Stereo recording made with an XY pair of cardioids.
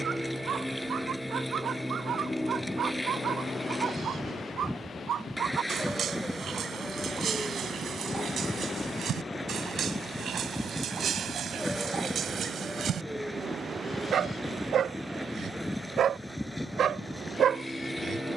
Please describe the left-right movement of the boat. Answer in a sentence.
You can hear the boat stay in one place.